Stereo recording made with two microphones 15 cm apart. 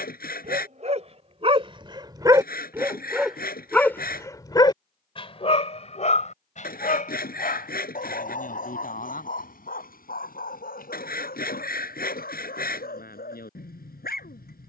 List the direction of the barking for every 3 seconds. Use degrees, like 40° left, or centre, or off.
30° right, 30° left, 60° left, 70° left, 80° left.